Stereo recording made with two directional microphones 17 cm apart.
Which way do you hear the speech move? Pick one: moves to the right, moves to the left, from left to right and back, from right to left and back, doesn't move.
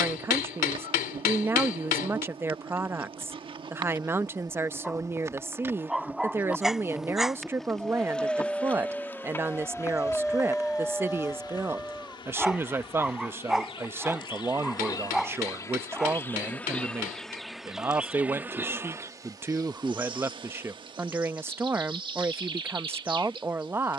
doesn't move.